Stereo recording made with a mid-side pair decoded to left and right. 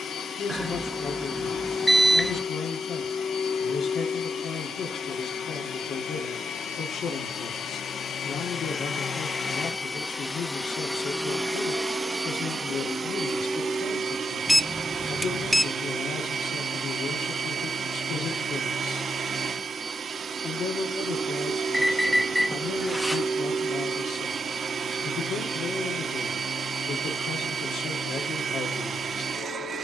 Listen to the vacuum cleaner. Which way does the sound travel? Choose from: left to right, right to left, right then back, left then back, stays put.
left to right.